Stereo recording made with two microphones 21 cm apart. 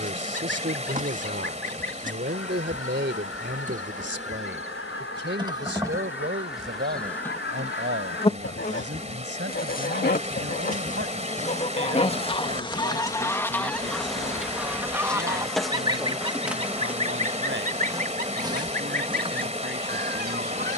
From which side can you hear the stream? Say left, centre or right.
right.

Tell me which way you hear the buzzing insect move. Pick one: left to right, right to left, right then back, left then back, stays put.
left then back.